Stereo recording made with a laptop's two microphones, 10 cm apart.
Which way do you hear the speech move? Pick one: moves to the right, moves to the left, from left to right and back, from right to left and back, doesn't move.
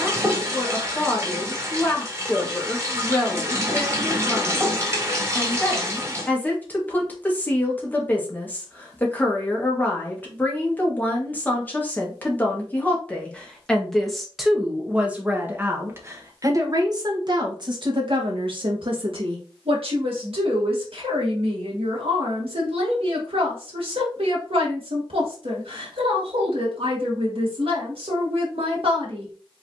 moves to the right.